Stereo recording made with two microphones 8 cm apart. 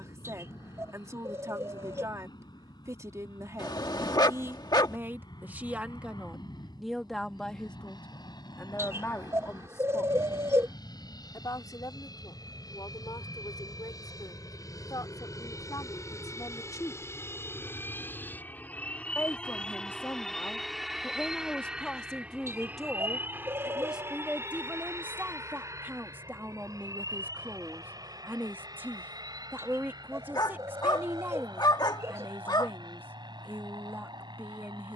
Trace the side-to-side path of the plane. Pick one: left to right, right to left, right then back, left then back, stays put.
left to right.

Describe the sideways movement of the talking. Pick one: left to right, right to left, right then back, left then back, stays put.
left then back.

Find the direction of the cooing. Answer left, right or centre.
right.